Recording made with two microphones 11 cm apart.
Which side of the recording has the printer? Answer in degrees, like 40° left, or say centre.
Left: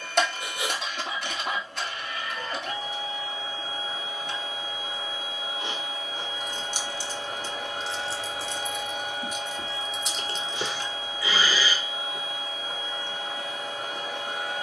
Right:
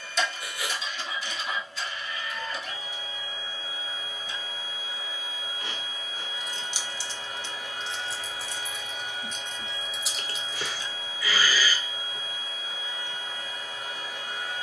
70° left.